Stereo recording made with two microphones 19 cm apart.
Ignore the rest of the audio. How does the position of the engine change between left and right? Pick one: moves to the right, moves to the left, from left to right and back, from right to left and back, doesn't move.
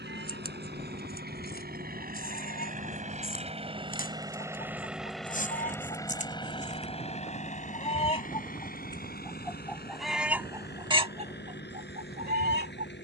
moves to the left.